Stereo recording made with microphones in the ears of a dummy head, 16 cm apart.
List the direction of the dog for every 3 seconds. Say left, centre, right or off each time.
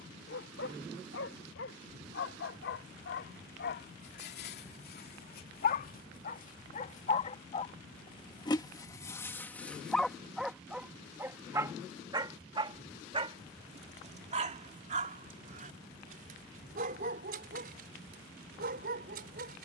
left, left, left, centre, right, right, right.